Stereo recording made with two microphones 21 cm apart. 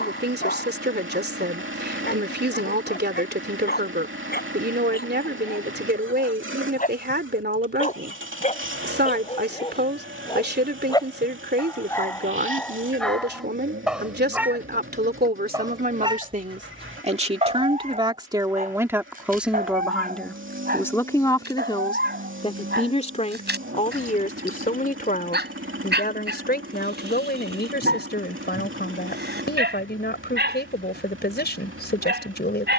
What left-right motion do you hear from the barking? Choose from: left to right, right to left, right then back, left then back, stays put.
left to right.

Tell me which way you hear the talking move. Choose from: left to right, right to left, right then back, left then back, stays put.
right to left.